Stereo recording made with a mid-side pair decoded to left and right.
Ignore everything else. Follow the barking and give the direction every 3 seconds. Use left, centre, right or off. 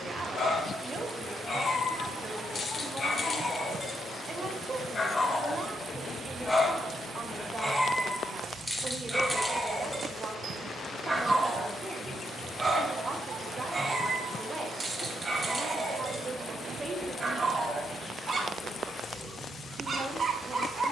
left, left, centre, centre, right, right, right.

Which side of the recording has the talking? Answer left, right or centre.
right.